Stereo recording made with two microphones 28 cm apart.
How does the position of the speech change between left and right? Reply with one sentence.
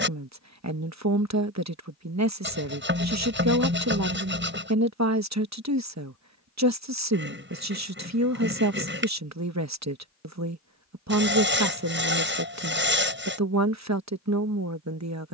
You can hear the speech stay put.